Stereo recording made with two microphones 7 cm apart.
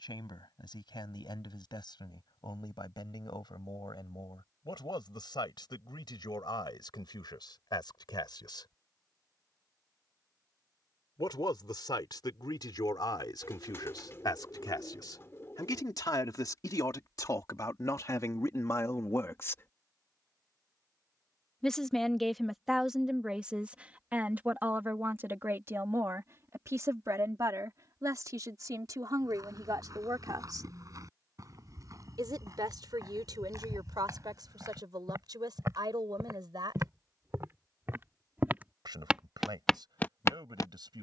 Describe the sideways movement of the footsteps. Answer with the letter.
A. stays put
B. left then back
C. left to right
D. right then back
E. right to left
E.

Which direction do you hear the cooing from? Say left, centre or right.
left.